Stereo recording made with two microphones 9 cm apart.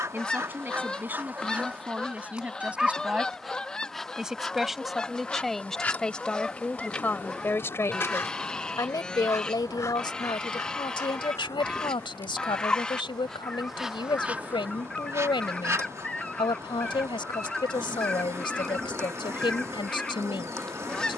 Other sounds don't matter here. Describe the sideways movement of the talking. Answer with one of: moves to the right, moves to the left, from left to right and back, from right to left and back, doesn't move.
moves to the left.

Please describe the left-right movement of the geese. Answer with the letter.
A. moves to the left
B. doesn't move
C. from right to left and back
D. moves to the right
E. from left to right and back
B.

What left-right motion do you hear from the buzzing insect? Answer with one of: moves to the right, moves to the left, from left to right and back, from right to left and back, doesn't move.
from right to left and back.